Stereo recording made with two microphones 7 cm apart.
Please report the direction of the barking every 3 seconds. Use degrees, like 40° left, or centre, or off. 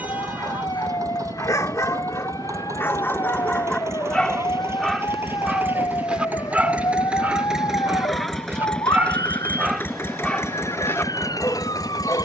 40° left, 10° left, 20° right, 20° left.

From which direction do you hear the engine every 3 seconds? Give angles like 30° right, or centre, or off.
50° right, 40° right, 10° right, 40° left.